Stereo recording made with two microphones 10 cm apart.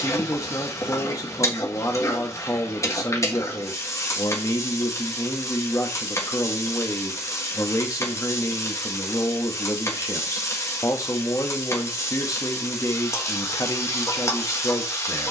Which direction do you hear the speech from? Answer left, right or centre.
left.